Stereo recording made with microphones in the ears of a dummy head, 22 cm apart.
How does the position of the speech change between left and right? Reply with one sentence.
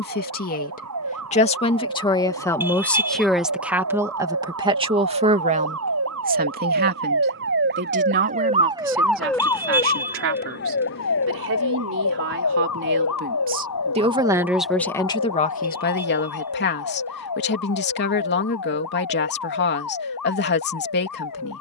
You can hear the speech move from left to right and back again.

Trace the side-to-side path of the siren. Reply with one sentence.
In this clip you hear the siren move from right to left.